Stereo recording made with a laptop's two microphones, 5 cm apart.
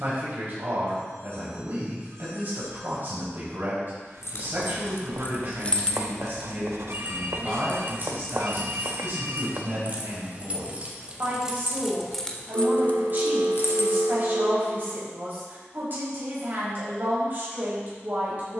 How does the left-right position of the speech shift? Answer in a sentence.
You can hear the speech stay in one place.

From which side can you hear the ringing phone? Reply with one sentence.
In this clip you hear the ringing phone on the right.